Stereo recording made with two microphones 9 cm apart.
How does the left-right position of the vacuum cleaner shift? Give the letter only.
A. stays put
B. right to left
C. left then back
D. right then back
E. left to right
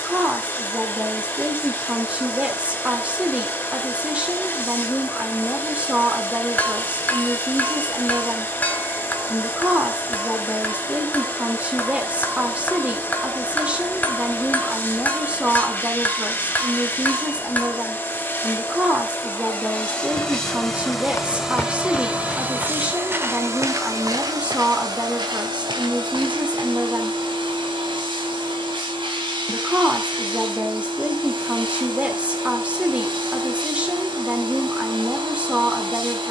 E.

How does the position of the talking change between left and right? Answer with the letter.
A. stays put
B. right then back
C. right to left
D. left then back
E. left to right
A.